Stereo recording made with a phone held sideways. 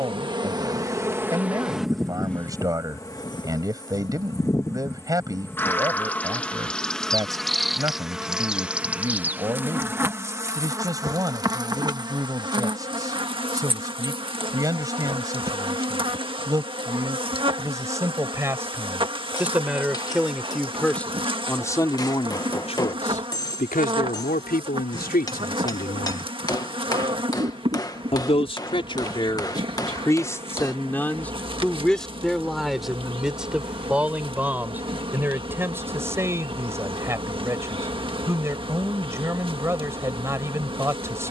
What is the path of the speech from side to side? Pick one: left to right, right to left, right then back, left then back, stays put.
left then back.